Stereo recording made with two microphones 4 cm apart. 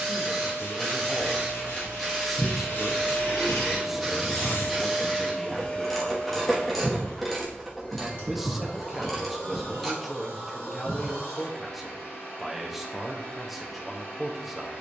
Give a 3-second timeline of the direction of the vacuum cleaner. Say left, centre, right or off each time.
right, centre, left, left, left.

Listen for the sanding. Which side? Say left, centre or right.
left.